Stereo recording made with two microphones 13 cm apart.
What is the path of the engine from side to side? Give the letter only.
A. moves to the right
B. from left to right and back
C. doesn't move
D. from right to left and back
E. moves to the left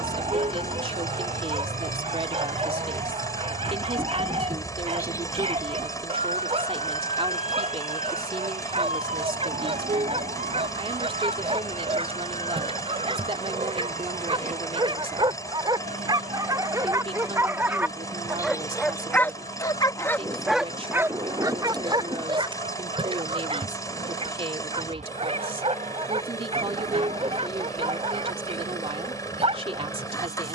C.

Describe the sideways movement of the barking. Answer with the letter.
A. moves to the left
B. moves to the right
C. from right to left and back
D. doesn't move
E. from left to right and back
C.